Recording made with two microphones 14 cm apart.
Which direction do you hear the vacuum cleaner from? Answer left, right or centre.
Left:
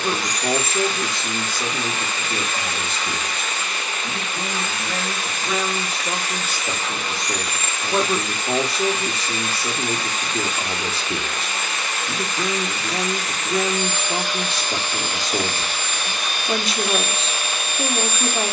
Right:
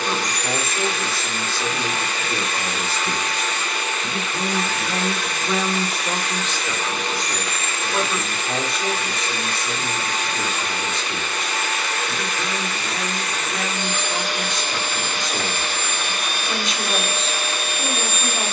right.